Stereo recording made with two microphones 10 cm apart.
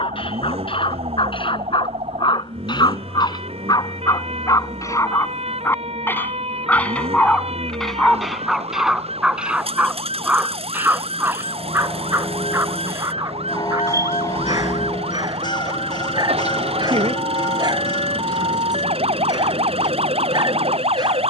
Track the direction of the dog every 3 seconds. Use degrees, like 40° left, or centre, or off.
60° left, 40° left, 10° left, 20° right, 30° right, 40° right, 40° right.